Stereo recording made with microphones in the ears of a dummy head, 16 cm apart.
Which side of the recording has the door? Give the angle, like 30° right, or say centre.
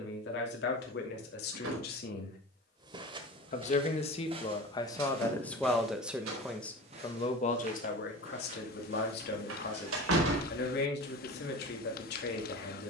90° right.